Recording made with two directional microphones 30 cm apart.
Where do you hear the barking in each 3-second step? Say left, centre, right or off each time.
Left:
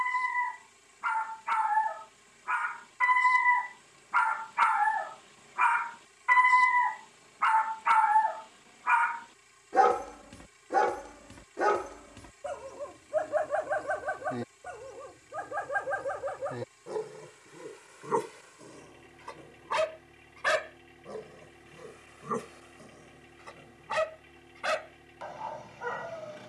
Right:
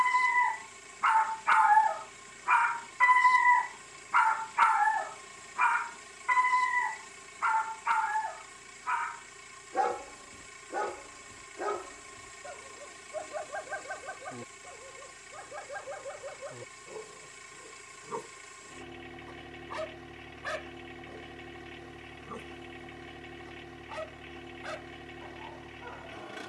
right, centre, left, left, left, left, left, left, left.